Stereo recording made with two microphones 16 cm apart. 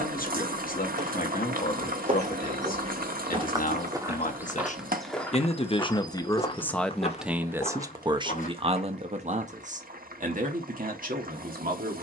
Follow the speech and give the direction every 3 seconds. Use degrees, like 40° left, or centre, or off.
60° left, 50° left, 10° right, 60° right.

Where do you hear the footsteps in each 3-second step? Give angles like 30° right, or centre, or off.
50° right, 10° right, 40° left, off.